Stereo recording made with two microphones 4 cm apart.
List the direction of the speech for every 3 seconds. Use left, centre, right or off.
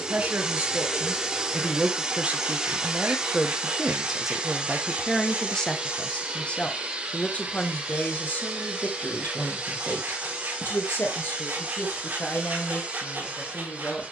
right, centre, left, left, left.